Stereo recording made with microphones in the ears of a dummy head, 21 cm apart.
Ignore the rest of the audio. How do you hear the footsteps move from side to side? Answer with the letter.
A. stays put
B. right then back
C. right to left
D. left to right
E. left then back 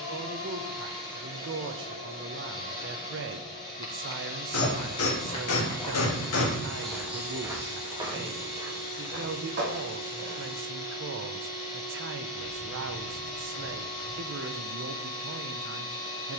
D.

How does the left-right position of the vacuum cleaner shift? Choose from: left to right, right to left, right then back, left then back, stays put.
stays put.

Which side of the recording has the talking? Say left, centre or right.
right.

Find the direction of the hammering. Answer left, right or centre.
left.